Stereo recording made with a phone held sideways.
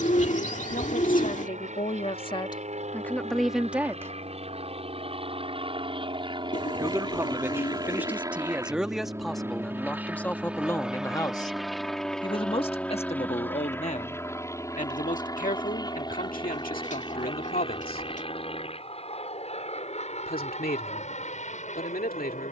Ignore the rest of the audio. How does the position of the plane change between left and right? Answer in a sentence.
You can hear the plane go from the right side to the left.